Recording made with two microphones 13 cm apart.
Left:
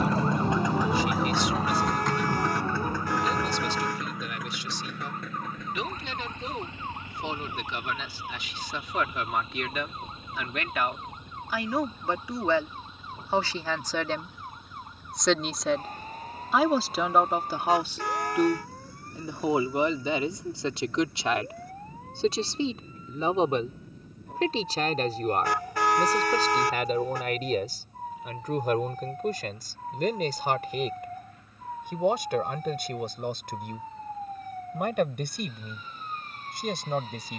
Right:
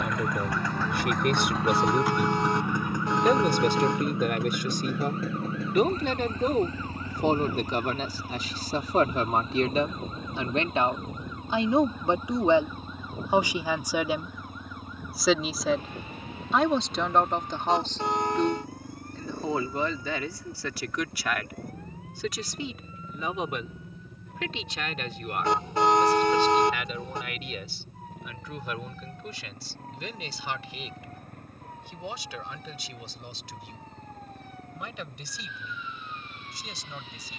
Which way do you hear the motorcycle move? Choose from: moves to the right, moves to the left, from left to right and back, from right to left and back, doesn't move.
moves to the right.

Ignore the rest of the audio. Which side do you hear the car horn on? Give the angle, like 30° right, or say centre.
20° right.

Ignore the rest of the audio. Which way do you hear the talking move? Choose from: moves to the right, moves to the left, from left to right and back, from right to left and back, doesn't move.
moves to the left.